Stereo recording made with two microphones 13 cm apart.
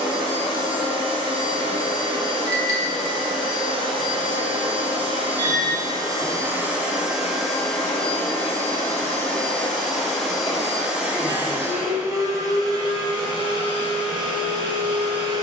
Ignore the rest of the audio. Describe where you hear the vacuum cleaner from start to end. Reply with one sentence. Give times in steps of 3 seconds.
You can hear the vacuum cleaner on the right from 0 s, in the centre from 6 s and on the right from 12 s.